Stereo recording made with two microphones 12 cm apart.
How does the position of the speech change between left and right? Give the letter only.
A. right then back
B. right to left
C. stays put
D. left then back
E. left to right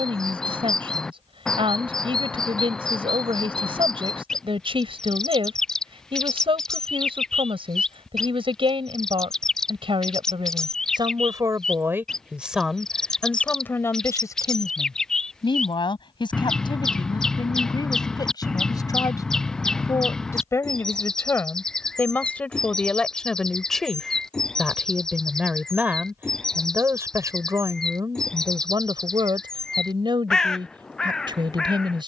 D.